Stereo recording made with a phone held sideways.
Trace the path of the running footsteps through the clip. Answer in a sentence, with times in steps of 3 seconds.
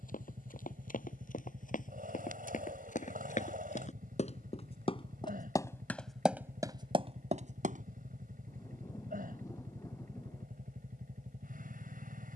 You can hear the running footsteps on the left from 0 s, on the right from 6 s and not at all from 9 s.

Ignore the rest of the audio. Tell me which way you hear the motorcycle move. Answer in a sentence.
In this clip you hear the motorcycle stay in one place.